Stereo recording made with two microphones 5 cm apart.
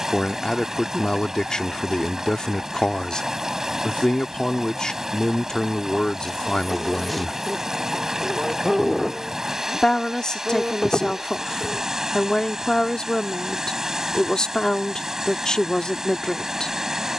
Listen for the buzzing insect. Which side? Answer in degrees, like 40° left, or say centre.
centre.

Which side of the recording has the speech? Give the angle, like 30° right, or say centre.
10° left.